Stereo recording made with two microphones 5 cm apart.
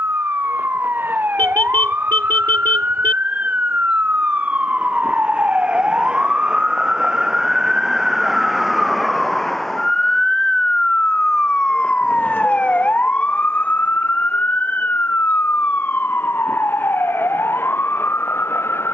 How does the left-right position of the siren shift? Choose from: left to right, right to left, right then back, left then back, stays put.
right to left.